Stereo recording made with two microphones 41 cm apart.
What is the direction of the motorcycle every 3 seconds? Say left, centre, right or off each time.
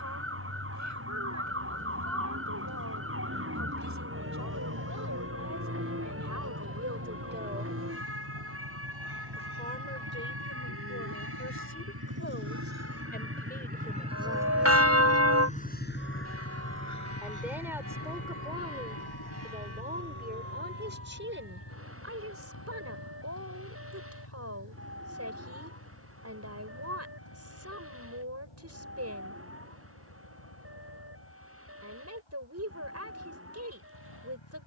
right, right, right, right, right, left, left, left, left, left, left, left.